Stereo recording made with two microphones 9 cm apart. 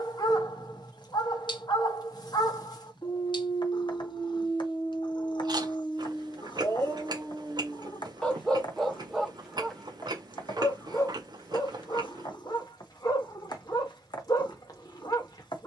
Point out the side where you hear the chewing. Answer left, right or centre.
right.